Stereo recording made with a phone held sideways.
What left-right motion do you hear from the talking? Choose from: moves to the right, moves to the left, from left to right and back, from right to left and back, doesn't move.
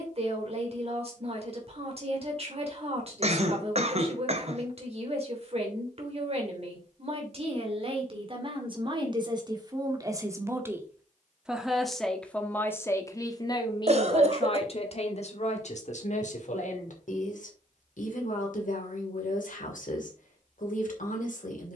moves to the left.